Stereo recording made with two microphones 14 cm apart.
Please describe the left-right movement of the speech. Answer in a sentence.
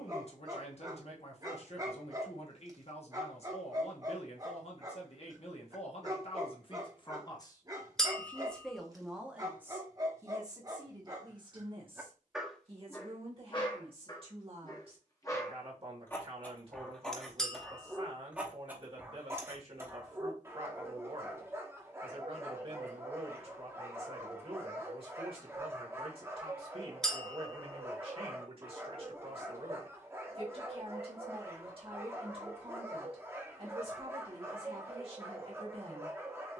You can hear the speech travel towards the right.